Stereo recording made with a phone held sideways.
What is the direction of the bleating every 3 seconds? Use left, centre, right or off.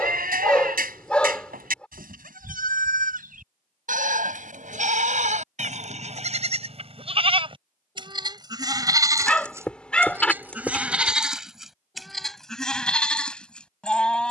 right, right, right, centre, centre.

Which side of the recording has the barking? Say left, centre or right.
centre.